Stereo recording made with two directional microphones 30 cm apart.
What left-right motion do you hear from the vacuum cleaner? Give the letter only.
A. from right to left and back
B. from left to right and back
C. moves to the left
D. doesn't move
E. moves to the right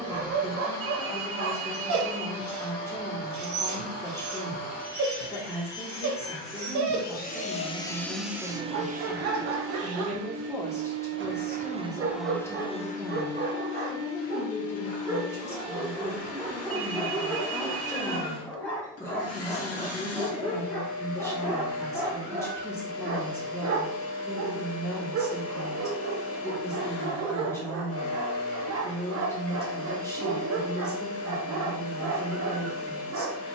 B.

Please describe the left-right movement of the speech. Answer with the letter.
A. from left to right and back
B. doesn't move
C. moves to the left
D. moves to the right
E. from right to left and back
B.